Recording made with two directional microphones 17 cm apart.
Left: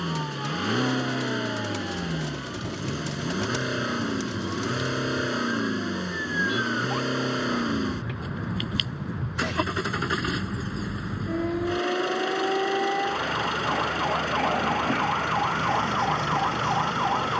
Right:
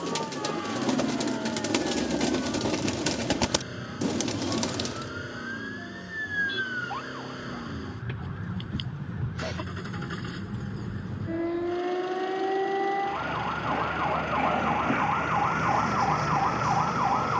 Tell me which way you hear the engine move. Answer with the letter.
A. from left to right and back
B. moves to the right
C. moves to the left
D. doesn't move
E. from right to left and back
D.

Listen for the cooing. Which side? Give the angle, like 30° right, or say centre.
50° right.